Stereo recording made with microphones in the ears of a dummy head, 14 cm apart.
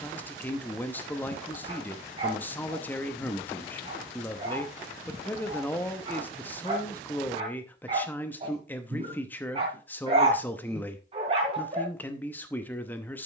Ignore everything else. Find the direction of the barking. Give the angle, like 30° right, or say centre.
40° right.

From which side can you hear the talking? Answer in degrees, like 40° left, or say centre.
10° left.